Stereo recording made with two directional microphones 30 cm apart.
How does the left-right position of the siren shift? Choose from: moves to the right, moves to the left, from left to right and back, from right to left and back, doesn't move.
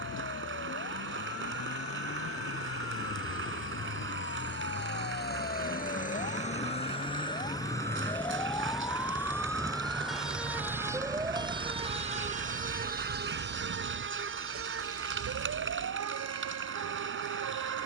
moves to the right.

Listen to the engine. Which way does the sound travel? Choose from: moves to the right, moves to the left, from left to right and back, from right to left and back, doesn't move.
moves to the right.